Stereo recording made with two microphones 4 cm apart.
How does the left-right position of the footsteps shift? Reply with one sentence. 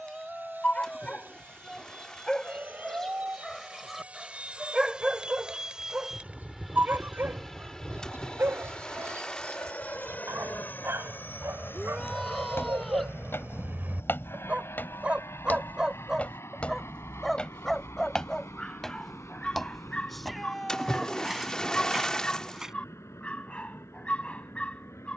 In this clip you hear the footsteps go from the left side to the right.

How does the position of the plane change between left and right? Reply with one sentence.
In this clip you hear the plane go from the right side to the left.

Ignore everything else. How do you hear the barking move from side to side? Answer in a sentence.
In this clip you hear the barking move from left to right and back again.